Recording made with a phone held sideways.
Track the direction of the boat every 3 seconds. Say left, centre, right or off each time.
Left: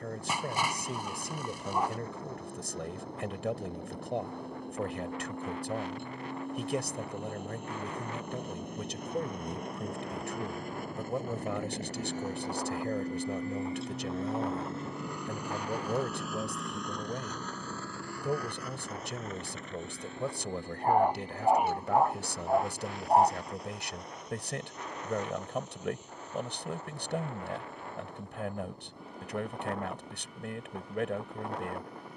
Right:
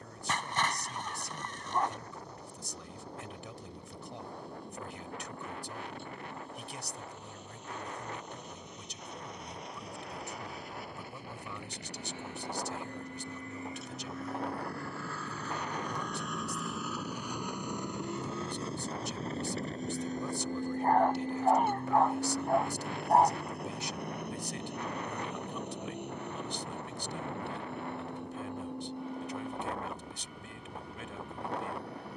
left, left, left, left, left, centre, right, right, right, right, right.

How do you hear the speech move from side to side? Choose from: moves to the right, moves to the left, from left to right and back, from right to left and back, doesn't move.
doesn't move.